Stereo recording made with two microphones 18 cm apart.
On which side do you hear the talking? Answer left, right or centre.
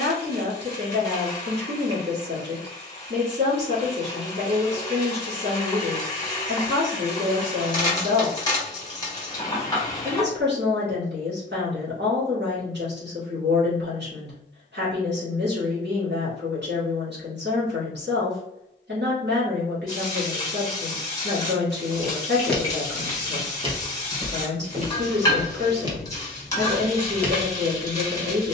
right.